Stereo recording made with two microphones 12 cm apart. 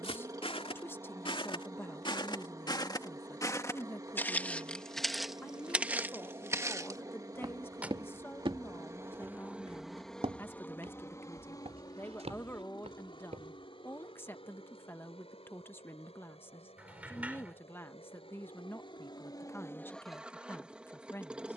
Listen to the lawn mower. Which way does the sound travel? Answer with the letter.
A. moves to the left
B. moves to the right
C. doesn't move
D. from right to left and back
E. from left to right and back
D.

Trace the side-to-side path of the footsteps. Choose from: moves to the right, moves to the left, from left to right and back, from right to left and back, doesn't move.
moves to the right.